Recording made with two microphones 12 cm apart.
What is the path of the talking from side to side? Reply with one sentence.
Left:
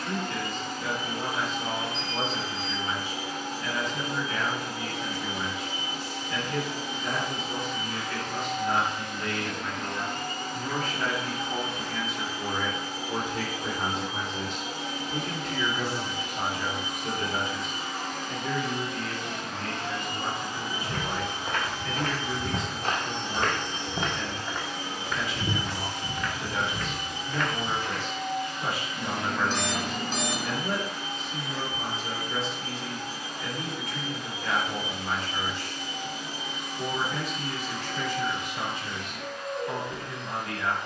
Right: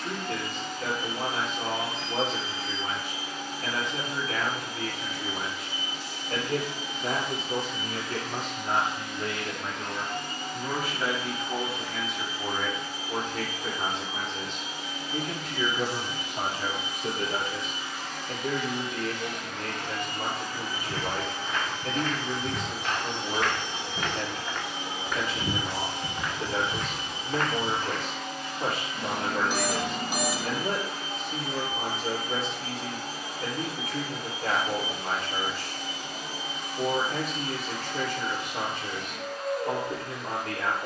You can hear the talking go left and come back.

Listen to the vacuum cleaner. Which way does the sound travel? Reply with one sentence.
In this clip you hear the vacuum cleaner move from left to right.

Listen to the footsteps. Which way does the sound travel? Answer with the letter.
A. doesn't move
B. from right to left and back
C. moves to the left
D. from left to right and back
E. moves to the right
E.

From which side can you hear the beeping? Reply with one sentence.
In this clip you hear the beeping in the centre.